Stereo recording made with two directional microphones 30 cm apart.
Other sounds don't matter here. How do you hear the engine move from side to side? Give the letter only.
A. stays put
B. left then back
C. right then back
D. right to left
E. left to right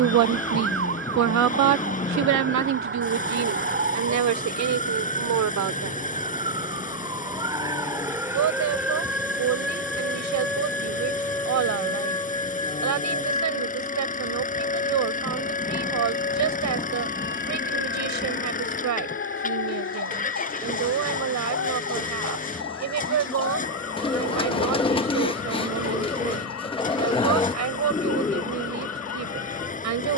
A.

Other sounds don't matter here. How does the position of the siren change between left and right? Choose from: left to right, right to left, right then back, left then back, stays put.
right to left.